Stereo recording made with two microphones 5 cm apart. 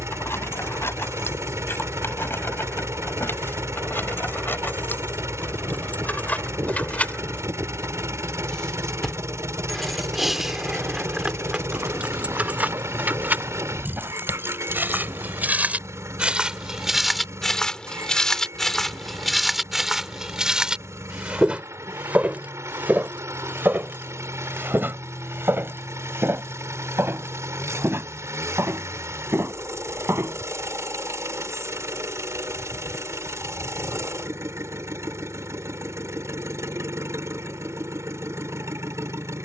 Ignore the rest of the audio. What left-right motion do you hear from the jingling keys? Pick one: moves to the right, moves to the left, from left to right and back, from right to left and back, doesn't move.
moves to the right.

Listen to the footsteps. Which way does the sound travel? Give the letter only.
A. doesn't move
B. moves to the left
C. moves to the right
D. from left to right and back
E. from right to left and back
E.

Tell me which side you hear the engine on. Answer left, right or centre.
right.